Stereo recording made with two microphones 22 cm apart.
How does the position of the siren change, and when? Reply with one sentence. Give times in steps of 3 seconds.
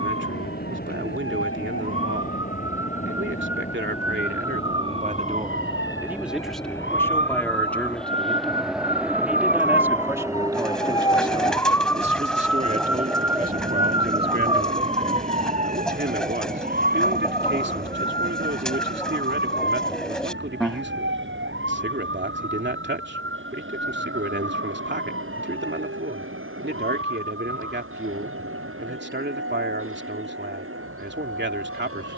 You can hear the siren on the left from 0 s, in the centre from 12 s and on the right from 15 s.